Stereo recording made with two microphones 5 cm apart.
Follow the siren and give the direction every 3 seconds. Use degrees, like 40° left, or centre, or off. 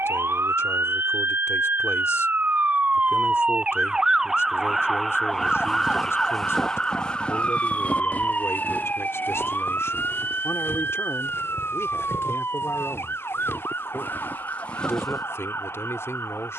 50° right, 10° right, 20° left, 40° left, 50° left, 50° left.